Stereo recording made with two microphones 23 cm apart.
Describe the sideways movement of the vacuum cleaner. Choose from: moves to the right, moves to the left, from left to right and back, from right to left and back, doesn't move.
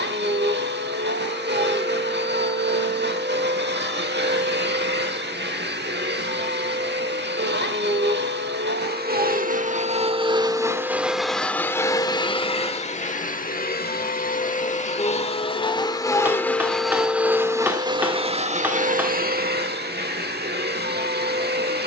from right to left and back.